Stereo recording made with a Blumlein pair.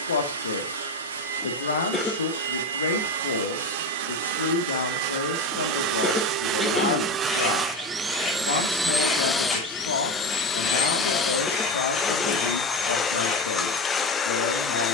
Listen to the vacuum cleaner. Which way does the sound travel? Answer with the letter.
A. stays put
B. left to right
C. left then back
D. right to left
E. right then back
D.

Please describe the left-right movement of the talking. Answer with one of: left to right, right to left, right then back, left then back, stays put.
stays put.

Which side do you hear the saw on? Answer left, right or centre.
left.